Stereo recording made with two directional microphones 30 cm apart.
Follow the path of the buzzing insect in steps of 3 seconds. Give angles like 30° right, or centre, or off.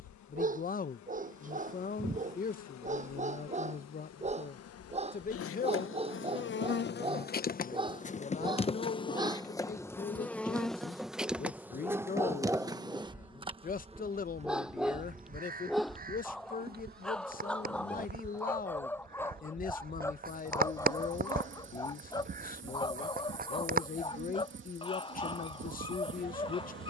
70° left, 50° left, 30° left, centre, 20° right, 30° right, 40° right, 40° right, 40° right.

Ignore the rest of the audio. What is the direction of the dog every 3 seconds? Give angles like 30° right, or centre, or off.
30° right, 20° right, 20° right, 10° right, 10° right, centre, 10° left, 10° left, 20° left.